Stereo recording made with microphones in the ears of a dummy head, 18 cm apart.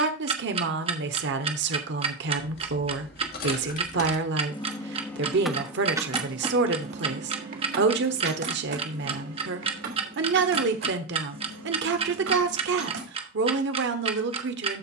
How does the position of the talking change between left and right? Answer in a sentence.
You can hear the talking stay put.